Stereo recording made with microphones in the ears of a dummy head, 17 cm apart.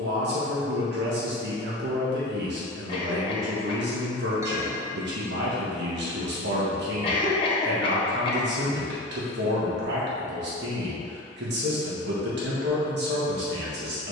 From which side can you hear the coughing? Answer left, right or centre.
left.